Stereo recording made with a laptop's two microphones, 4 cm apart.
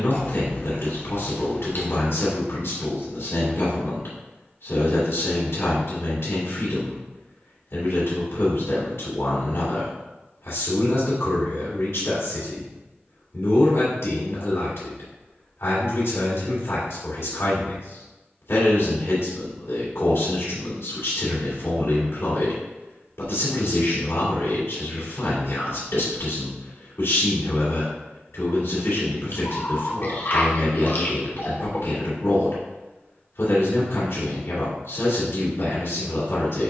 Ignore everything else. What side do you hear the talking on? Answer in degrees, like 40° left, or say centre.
80° left.